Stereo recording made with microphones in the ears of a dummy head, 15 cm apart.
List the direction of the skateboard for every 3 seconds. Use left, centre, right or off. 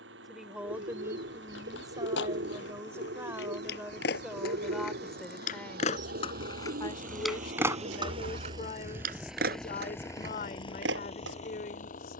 left, left, centre, right.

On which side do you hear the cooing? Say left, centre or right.
right.